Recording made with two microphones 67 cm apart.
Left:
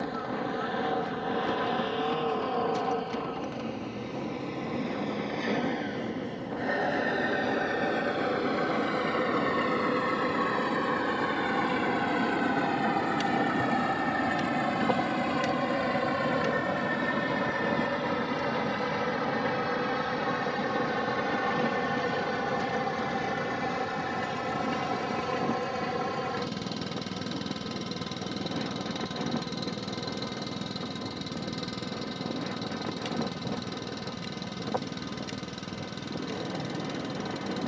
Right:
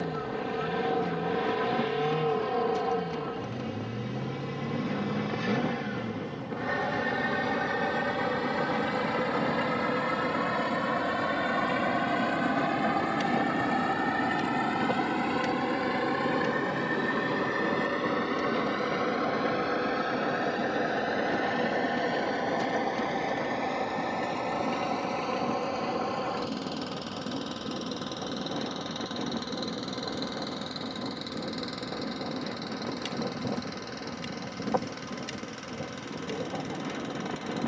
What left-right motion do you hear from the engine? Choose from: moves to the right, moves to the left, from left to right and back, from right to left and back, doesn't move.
moves to the left.